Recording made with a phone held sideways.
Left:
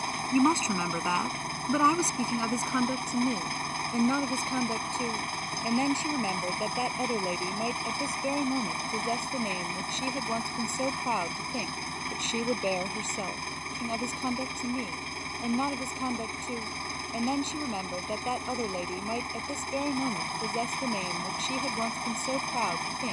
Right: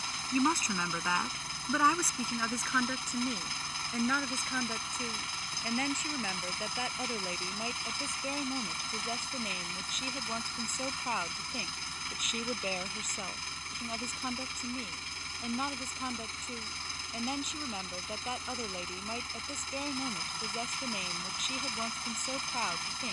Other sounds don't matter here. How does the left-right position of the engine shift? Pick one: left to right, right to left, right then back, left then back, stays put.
stays put.